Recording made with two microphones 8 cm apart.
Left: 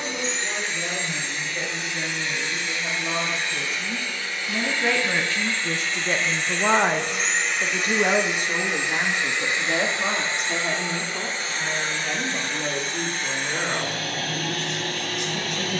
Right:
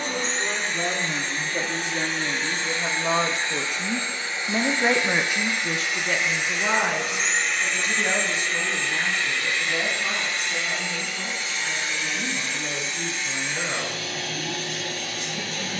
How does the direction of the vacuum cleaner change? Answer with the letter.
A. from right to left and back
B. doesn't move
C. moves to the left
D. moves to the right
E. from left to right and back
C.